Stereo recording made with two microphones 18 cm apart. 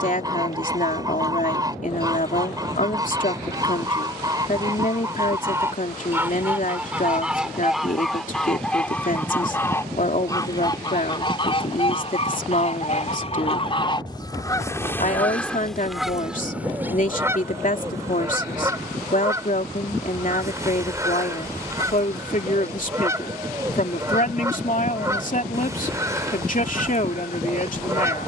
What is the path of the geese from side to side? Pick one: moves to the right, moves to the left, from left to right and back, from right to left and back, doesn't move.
from right to left and back.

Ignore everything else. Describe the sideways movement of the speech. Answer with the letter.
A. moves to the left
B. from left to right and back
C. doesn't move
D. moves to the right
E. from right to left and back
C.